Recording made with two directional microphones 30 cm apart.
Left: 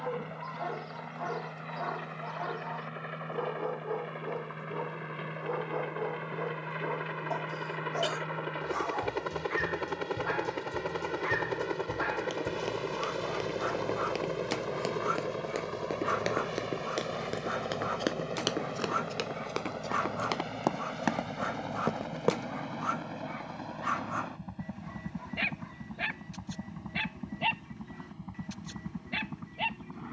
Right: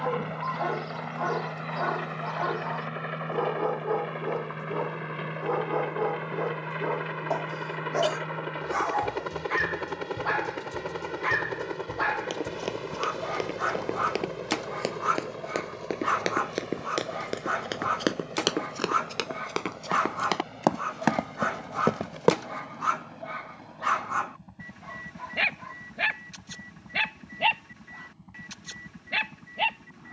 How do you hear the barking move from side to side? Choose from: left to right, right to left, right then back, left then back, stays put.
stays put.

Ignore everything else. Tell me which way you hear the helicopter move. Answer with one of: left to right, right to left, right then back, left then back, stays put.
right to left.